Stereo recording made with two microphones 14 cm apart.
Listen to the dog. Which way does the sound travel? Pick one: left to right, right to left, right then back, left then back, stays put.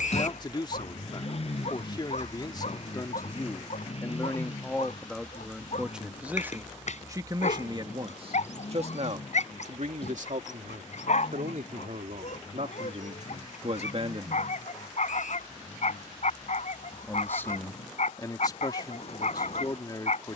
stays put.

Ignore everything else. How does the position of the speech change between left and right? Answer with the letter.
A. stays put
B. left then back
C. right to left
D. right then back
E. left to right
D.